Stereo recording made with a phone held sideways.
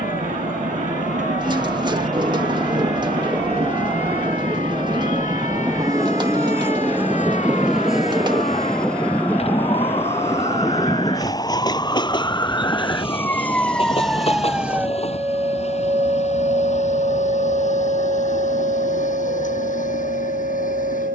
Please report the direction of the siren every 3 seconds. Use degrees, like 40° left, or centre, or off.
60° left, 50° left, 50° left, 30° left, 10° left, 40° right, 70° right.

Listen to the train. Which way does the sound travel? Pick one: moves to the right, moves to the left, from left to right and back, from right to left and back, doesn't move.
moves to the left.